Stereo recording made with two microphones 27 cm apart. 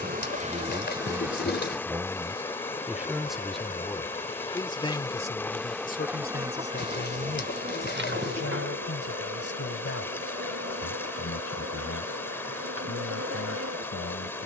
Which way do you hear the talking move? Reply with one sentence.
You can hear the talking move from right to left.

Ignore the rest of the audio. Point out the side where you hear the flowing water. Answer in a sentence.
In this clip you hear the flowing water in the centre.